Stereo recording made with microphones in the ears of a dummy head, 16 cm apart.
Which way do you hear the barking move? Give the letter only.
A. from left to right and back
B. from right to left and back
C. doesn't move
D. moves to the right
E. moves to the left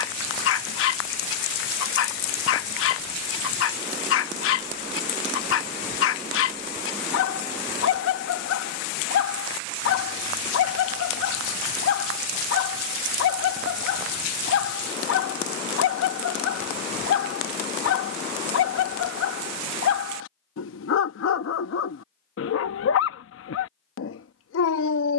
C.